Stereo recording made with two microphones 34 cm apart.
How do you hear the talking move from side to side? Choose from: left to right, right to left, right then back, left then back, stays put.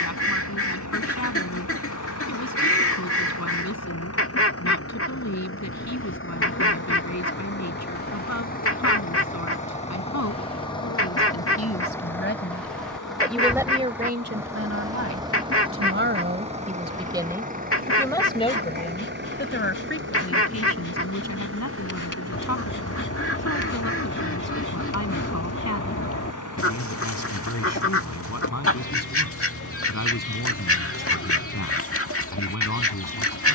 right then back.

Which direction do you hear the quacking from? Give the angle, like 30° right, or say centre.
40° left.